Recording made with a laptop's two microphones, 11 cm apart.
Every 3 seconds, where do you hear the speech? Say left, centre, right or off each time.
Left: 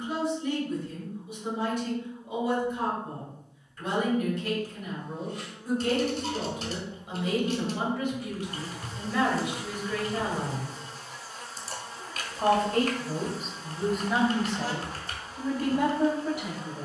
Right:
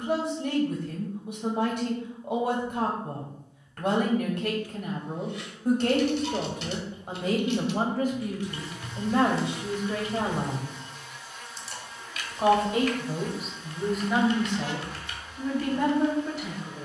right, right, right, right, centre, centre.